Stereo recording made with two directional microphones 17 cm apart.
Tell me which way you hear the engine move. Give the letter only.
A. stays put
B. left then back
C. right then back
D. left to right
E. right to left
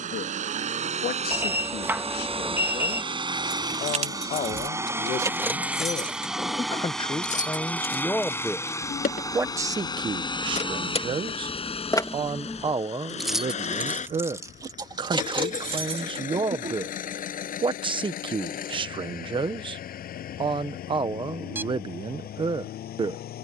E.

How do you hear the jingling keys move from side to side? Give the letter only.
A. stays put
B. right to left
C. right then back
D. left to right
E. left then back
E.